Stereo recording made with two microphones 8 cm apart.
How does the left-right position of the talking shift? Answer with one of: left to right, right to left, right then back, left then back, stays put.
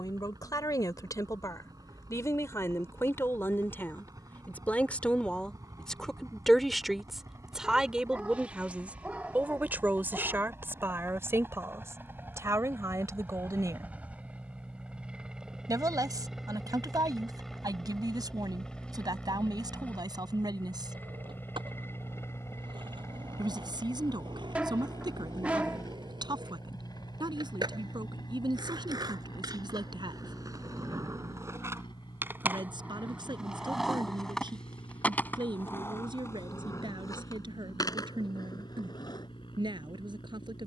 left to right.